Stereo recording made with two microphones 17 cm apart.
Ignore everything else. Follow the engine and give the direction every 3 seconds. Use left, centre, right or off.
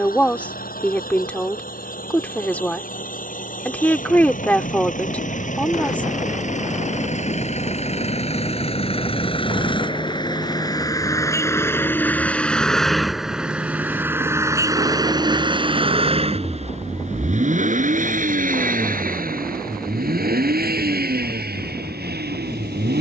left, left, left, left, centre, right, right, right.